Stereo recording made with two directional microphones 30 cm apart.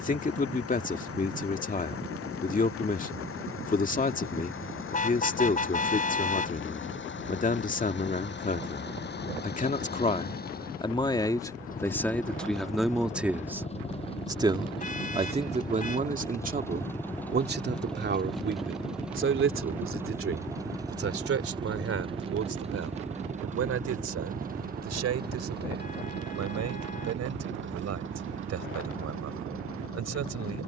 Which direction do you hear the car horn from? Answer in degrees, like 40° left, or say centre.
30° left.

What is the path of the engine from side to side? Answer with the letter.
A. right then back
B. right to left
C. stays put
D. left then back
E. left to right
E.